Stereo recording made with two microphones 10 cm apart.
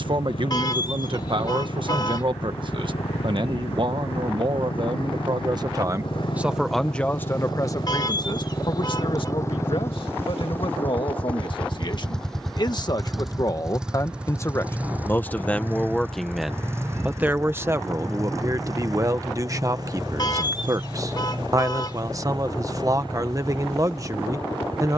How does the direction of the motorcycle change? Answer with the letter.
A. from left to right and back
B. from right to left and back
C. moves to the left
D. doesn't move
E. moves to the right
E.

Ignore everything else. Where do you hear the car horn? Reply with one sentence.
You can hear the car horn on the left.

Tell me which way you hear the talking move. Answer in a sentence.
In this clip you hear the talking go left and come back.